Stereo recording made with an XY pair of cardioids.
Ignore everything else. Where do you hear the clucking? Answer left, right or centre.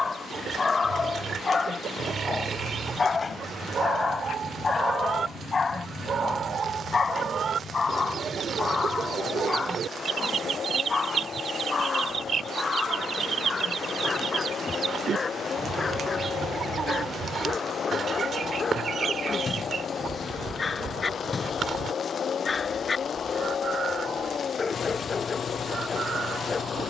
right.